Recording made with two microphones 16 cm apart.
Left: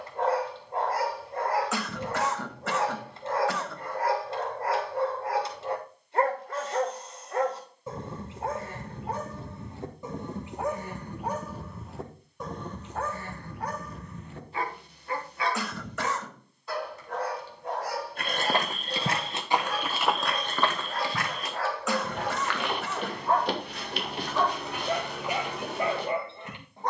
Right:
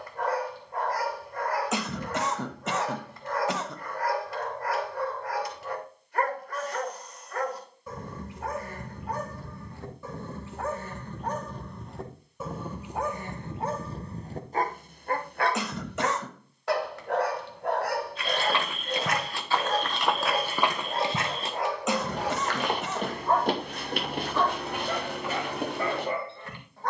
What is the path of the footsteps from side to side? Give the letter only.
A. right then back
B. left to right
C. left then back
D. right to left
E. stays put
B.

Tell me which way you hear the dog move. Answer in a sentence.
You can hear the dog go right and come back.